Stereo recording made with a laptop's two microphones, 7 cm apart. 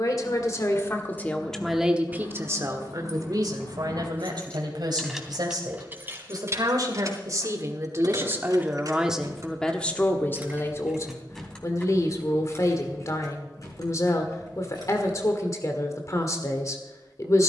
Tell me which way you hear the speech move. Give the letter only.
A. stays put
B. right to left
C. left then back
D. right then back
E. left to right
D.